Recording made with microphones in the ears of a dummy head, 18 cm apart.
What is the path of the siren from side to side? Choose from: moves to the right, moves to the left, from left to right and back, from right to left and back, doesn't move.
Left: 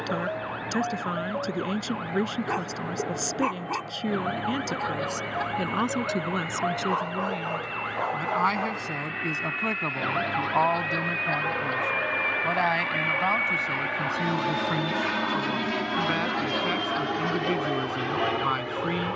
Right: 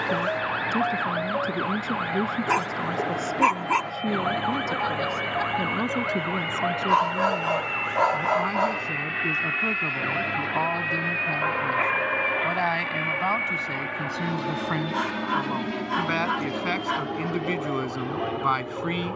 moves to the left.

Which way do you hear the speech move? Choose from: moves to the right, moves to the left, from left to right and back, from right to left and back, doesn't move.
moves to the right.